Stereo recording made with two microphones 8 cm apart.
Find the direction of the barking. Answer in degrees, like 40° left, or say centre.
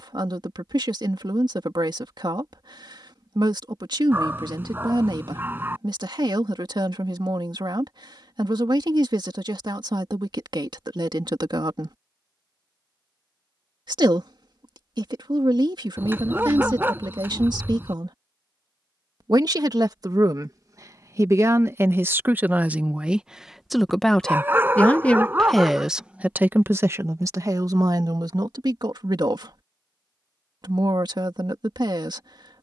30° right.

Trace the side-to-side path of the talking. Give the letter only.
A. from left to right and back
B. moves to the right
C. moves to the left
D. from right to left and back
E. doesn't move
D.